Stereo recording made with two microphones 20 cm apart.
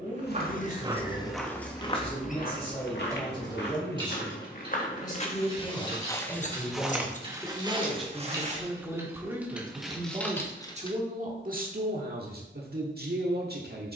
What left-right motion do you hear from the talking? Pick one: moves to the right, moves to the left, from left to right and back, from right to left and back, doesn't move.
moves to the right.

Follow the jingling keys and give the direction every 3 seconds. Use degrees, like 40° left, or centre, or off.
20° left, 20° right, 20° right, centre, off.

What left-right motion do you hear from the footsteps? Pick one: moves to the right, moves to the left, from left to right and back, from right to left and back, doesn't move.
from right to left and back.